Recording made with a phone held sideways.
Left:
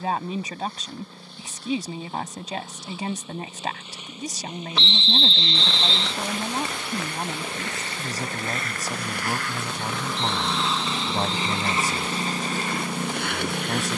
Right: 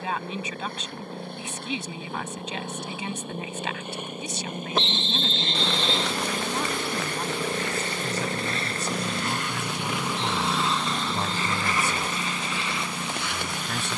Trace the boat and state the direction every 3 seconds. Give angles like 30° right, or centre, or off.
50° right, 50° right, 40° right, centre, 50° left.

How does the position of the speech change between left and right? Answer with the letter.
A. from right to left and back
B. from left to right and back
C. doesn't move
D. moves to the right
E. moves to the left
C.